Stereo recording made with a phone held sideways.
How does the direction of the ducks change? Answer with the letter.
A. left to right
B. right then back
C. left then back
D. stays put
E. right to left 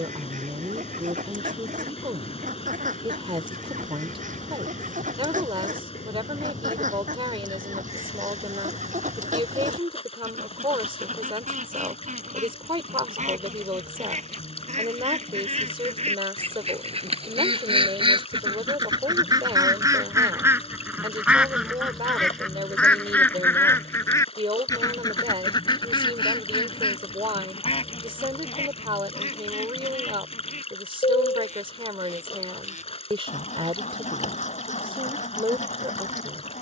E.